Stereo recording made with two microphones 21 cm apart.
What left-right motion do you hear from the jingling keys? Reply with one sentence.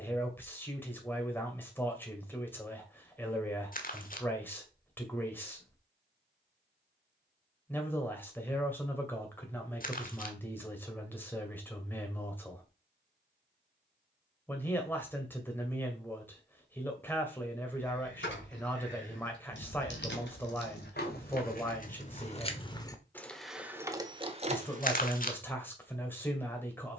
In this clip you hear the jingling keys move from left to right.